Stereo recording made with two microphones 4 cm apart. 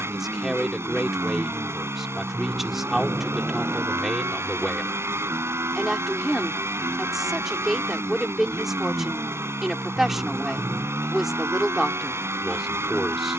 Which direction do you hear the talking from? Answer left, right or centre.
centre.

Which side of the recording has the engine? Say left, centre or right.
right.